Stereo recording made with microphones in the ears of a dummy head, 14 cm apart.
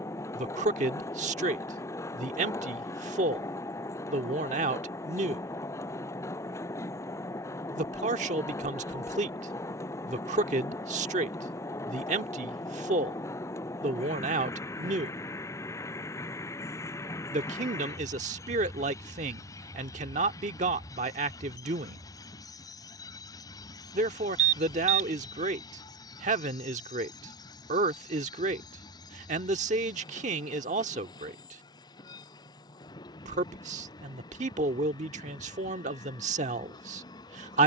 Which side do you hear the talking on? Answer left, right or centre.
right.